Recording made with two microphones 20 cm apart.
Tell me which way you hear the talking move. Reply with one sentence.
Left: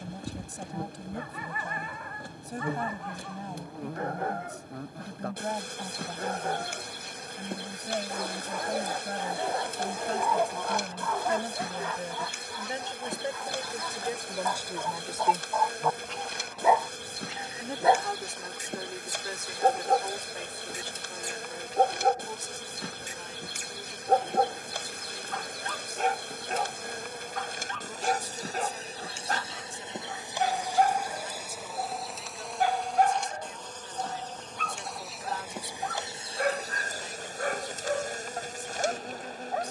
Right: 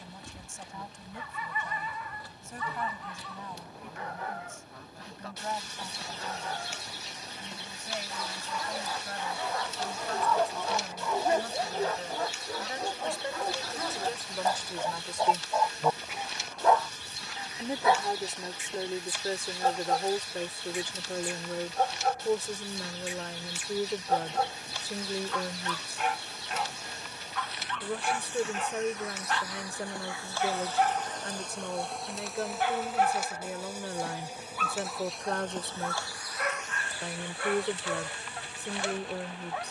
In this clip you hear the talking go from the left side to the right.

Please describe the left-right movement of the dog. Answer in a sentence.
You can hear the dog move from left to right and back again.